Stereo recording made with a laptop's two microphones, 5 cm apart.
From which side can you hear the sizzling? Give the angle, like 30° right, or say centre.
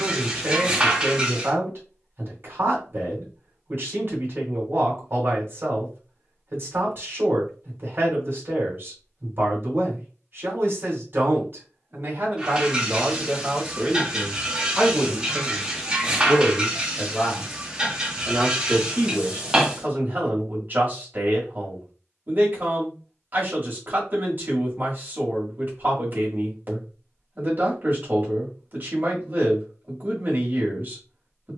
20° right.